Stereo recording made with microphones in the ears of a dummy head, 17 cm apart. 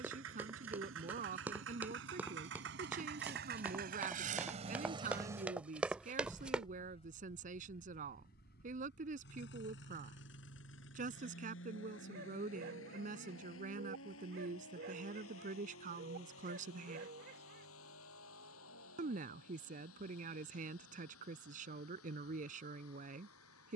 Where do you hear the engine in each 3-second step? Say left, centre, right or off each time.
right, right, left, left, left, left, left, left.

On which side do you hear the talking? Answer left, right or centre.
right.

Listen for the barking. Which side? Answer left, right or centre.
right.